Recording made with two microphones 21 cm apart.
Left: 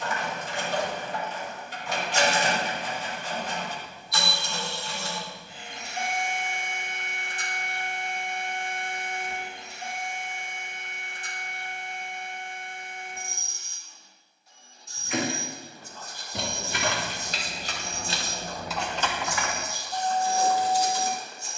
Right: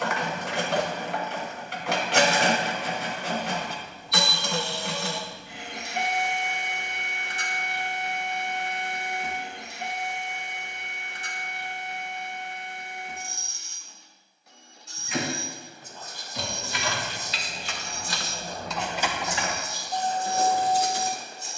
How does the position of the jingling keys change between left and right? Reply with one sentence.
You can hear the jingling keys move to the right.